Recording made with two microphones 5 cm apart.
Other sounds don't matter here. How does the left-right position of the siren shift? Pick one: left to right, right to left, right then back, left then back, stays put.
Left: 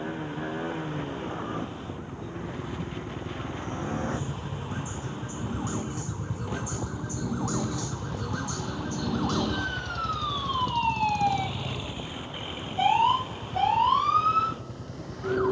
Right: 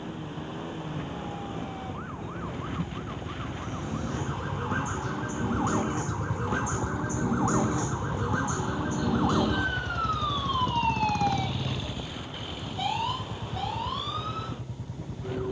right to left.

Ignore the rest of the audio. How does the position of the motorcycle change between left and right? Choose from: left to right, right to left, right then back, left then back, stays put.
left to right.